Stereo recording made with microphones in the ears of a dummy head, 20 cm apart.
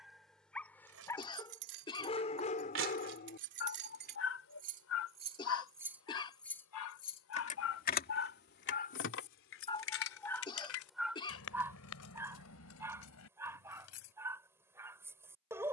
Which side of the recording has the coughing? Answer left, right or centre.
left.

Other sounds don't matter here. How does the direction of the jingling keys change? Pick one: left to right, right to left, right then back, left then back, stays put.
right to left.